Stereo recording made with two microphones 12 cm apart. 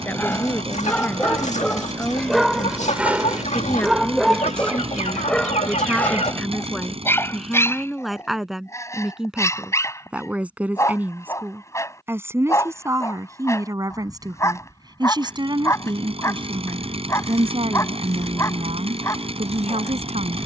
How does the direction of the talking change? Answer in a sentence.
You can hear the talking go from the left side to the right.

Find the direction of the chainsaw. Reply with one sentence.
You can hear the chainsaw on the right.